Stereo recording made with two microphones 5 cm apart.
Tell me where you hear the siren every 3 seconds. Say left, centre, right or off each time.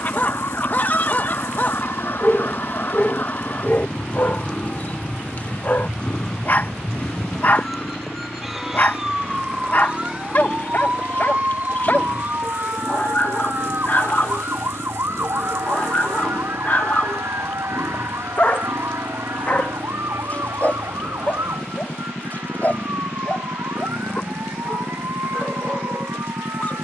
left, left, centre, right, right, right, right, right, right.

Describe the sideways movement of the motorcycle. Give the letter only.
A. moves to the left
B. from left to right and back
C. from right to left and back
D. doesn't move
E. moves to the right
D.